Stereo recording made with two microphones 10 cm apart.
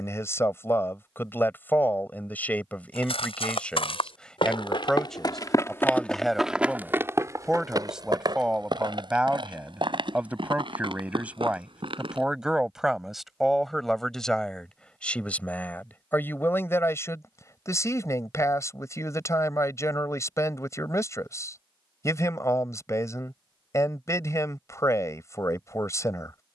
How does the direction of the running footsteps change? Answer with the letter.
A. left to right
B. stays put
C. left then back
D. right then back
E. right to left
A.